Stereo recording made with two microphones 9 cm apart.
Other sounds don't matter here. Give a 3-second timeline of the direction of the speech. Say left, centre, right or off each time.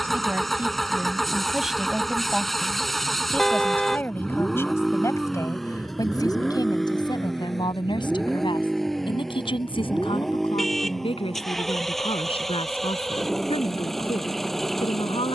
centre, left, left, left, left.